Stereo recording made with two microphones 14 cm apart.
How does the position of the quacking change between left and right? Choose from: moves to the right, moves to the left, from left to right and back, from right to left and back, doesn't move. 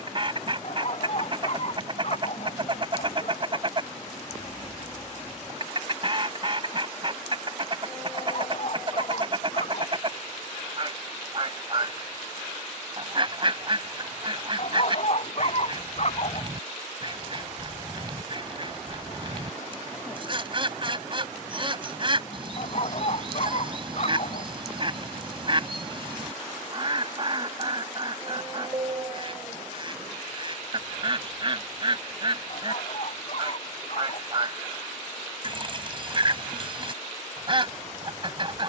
doesn't move.